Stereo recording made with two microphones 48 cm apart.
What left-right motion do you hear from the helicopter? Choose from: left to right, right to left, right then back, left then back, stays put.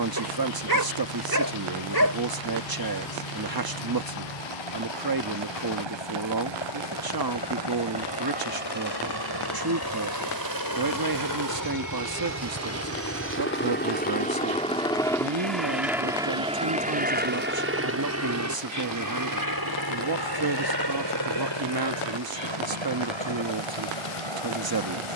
left to right.